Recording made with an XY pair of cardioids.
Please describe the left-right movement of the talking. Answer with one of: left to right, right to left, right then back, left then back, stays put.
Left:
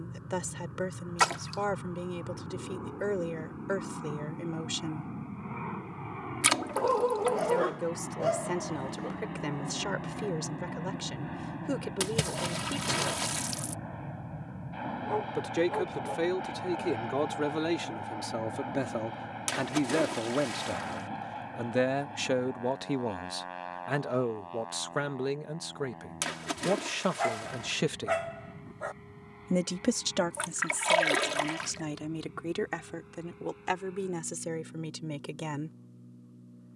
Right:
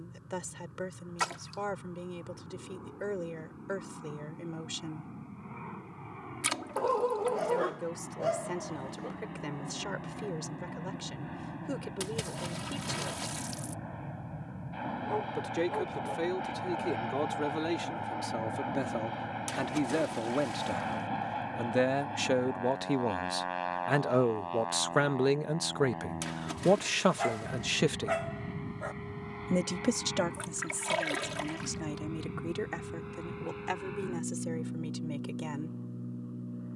right then back.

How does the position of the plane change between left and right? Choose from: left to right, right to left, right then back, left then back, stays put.
left to right.